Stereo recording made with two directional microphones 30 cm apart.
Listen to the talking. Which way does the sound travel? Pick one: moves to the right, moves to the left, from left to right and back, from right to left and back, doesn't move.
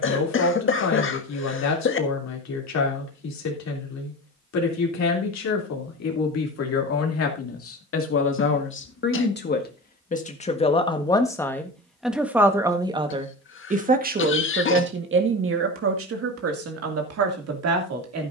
moves to the right.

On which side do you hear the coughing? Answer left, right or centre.
left.